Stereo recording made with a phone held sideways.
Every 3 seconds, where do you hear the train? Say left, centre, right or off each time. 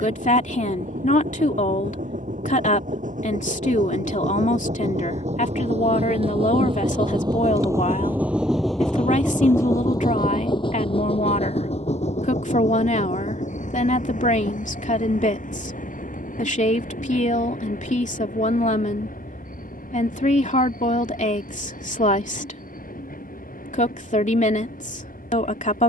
right, right, right, left, left, left, left, left, left.